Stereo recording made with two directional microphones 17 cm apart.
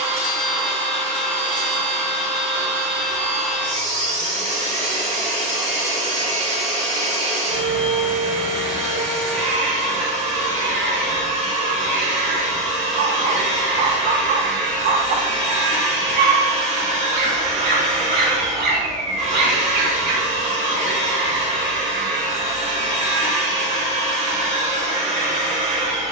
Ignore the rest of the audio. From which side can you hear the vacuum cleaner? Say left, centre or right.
right.